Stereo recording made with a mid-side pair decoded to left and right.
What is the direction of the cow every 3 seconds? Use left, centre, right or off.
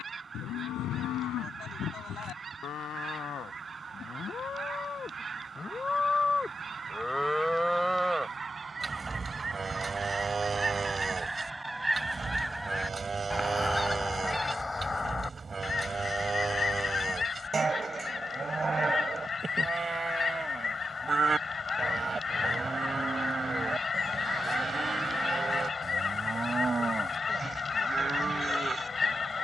left, left, centre, right, right, right, right, right, right, right.